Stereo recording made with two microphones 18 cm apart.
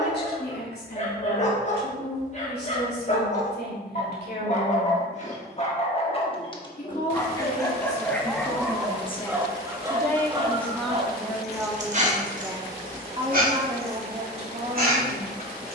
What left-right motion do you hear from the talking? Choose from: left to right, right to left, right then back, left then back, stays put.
left to right.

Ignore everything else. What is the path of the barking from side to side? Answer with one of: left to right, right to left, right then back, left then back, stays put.
left to right.